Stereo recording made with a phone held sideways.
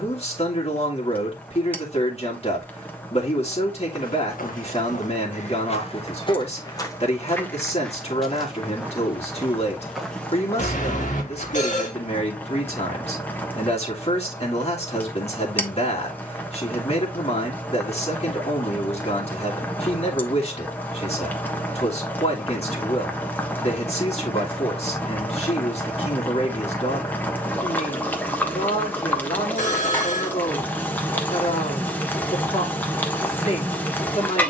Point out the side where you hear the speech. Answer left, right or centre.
left.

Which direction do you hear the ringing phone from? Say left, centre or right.
left.